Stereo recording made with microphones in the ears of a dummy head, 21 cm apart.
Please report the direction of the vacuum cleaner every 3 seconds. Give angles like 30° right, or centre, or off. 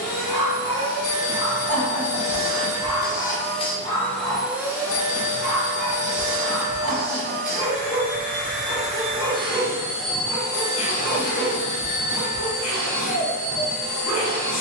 60° left, centre, 40° right, 20° left, 70° left.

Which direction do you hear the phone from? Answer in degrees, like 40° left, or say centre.
40° left.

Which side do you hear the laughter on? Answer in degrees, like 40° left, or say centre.
80° right.